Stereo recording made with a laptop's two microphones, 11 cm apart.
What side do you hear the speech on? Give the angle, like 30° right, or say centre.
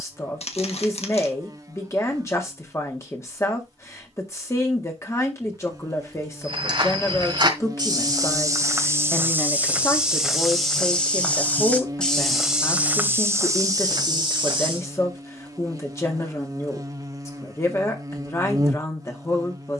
30° left.